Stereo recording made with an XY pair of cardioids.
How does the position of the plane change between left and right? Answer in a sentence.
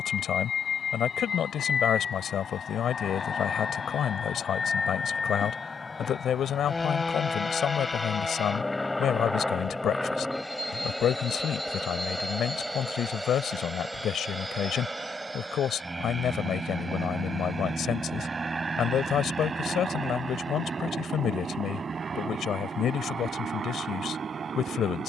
You can hear the plane move from left to right.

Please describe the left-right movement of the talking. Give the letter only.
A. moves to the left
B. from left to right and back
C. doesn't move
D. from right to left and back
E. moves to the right
C.